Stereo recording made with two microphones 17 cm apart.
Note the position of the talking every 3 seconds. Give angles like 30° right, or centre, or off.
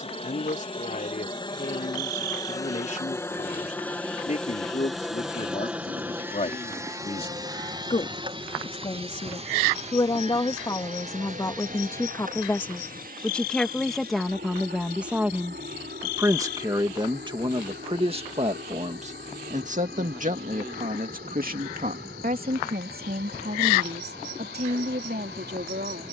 50° left, 40° left, 40° left, 20° left, centre, 20° right, 50° right, 60° right, 70° right.